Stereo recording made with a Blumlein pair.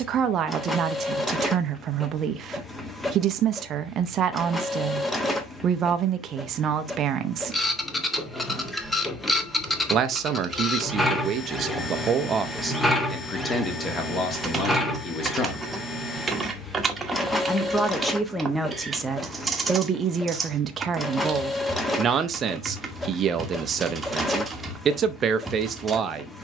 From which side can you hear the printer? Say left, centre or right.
centre.